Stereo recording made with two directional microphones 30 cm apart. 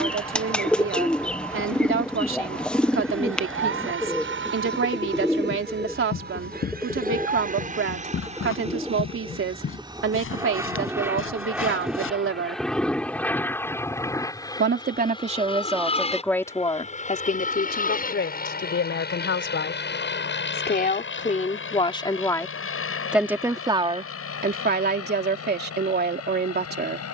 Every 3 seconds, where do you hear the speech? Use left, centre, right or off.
right, right, right, right, right, centre, left, centre, right.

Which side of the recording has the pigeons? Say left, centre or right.
centre.